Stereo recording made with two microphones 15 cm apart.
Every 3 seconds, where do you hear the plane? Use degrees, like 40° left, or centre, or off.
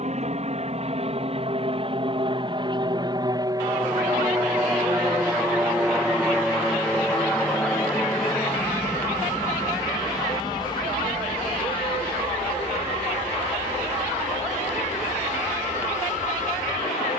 40° right, 20° right, 10° left, 30° left, 40° left, 50° left.